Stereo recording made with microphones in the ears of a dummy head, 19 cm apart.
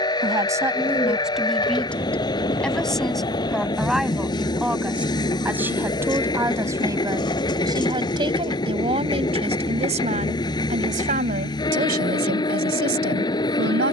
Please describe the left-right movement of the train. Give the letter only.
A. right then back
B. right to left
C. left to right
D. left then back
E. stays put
E.